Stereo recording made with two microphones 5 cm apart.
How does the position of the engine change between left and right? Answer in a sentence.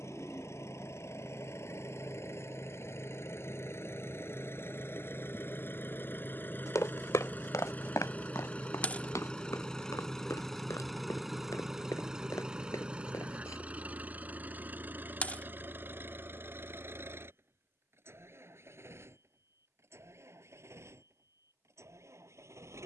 In this clip you hear the engine go from the left side to the right.